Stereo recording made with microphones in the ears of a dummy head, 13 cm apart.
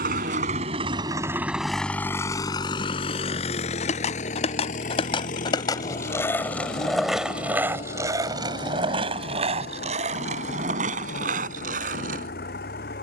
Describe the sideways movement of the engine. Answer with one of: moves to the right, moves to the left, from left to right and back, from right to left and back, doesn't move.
moves to the left.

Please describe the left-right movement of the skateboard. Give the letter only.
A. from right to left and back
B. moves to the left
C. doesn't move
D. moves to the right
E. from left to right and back
D.